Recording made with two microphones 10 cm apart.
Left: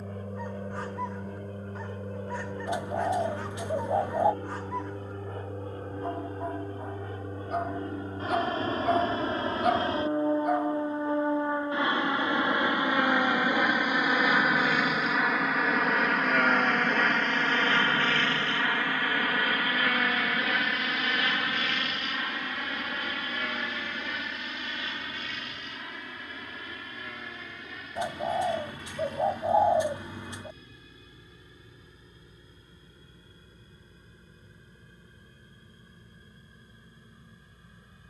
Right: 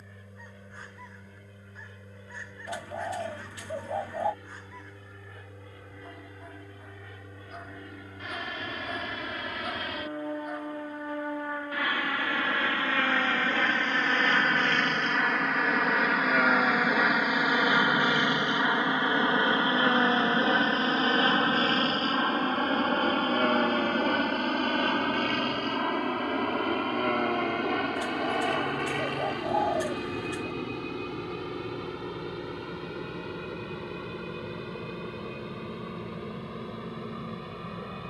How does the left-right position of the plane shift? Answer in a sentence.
In this clip you hear the plane move from left to right.